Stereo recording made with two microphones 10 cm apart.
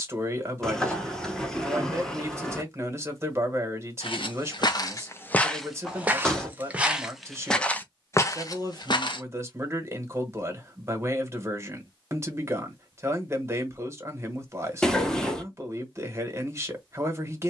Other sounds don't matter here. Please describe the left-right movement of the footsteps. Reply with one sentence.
In this clip you hear the footsteps move from left to right and back again.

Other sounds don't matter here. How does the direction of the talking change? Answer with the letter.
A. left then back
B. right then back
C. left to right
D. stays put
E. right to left
D.